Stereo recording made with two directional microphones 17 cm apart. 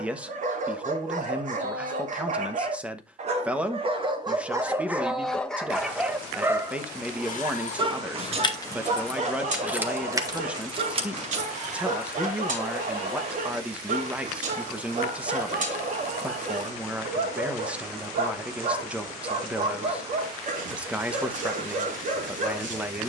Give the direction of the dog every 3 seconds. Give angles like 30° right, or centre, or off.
50° right, 20° right, 30° right, 50° right, 50° right, 50° right, 50° right, 50° right.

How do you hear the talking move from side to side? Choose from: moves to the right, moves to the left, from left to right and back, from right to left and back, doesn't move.
doesn't move.